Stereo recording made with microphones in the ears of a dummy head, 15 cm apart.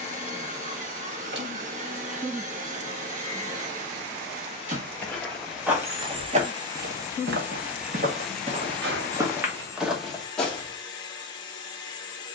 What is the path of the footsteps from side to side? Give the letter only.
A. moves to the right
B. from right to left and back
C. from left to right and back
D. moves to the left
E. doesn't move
C.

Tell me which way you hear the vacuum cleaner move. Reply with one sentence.
You can hear the vacuum cleaner move from right to left.